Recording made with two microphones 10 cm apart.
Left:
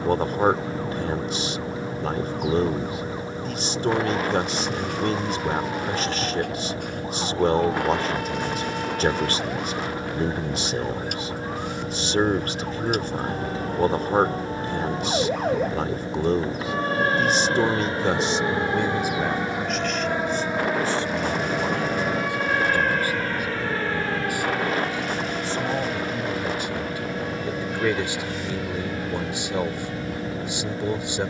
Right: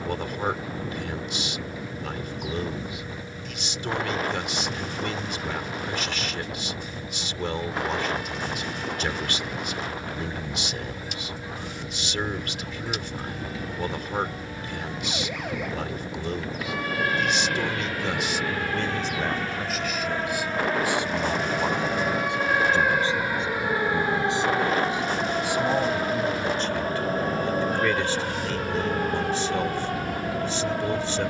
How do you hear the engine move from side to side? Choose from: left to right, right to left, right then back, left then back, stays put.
stays put.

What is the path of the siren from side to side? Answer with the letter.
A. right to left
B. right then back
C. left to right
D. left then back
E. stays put
C.